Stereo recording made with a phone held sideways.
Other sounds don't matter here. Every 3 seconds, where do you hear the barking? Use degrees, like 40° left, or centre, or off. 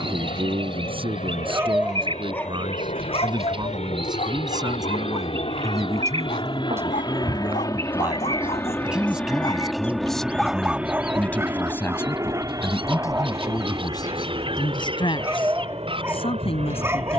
10° right, 60° left, 60° left, centre, 20° right, 20° right.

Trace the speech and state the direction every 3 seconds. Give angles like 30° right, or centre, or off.
40° right, 30° right, 20° right, 10° left, 30° left, 40° left.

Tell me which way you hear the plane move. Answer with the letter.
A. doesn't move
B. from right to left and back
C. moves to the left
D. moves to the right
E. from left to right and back
D.